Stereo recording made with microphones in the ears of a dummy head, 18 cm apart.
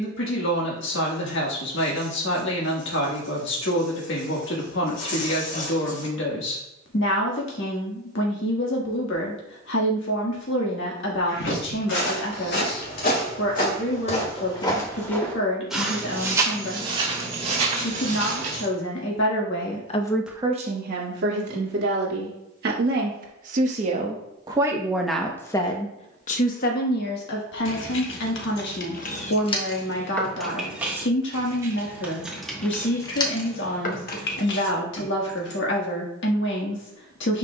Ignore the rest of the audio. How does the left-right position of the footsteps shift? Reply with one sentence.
You can hear the footsteps move to the right.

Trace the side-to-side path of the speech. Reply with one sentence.
You can hear the speech go right and come back.